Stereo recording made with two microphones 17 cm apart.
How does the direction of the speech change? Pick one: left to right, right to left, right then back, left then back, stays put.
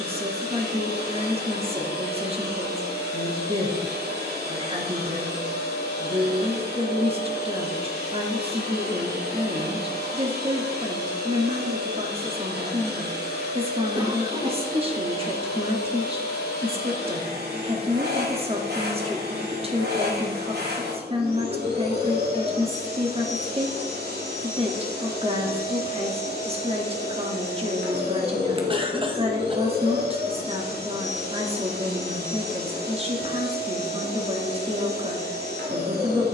stays put.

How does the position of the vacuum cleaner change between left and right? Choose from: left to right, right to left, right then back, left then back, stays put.
stays put.